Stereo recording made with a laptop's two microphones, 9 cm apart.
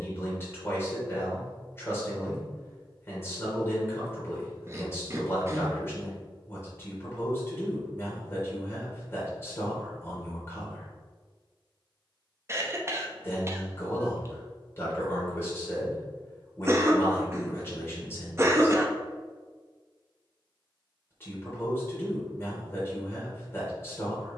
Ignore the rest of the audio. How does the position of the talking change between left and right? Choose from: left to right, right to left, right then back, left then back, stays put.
stays put.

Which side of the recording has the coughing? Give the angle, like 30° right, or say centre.
30° right.